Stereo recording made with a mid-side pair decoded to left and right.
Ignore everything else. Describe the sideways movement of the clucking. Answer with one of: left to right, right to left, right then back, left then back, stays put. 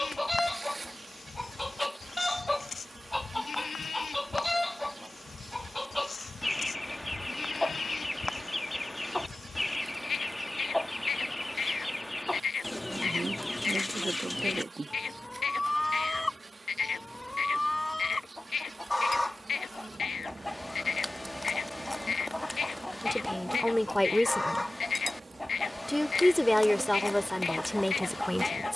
stays put.